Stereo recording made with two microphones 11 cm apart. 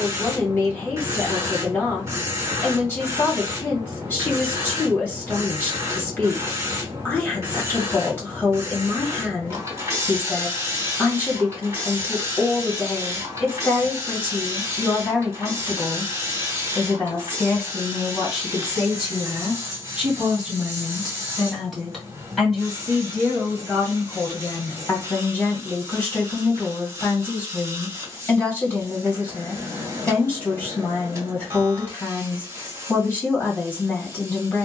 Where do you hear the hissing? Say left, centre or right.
right.